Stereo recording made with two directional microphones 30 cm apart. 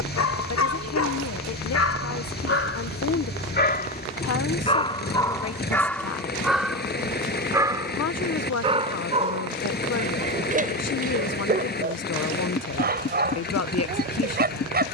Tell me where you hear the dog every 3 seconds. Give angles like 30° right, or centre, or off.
50° left, 20° left, 10° right, 30° right, 30° right.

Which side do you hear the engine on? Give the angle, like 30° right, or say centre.
30° left.